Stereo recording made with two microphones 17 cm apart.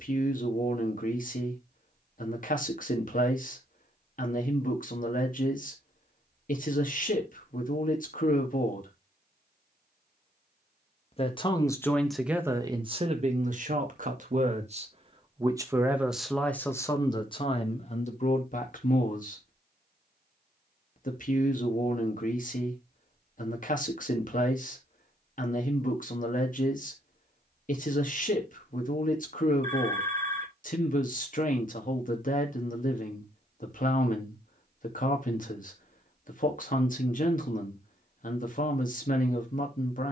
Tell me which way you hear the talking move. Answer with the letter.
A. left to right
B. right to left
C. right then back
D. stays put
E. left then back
C.